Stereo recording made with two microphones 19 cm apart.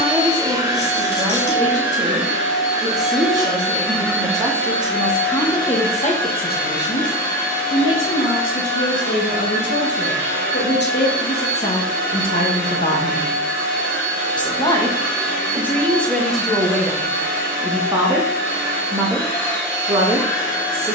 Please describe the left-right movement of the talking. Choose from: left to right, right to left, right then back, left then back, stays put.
left then back.